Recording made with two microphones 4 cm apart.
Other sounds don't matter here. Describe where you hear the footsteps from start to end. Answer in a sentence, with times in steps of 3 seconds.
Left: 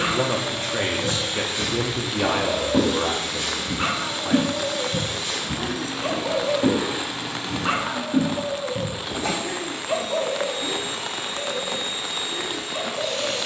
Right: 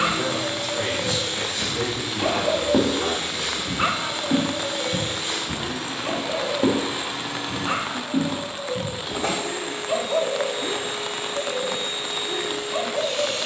You can hear the footsteps in the centre from 0 s, on the right from 3 s, in the centre from 6 s and not at all from 9 s.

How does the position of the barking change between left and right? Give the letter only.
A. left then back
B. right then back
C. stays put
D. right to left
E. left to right
A.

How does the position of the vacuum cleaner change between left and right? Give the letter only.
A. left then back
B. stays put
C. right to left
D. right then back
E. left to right
E.